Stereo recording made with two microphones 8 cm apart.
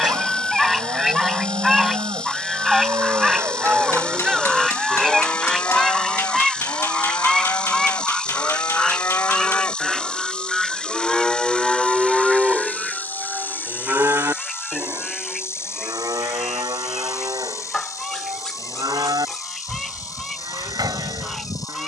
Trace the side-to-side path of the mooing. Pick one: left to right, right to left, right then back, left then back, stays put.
left then back.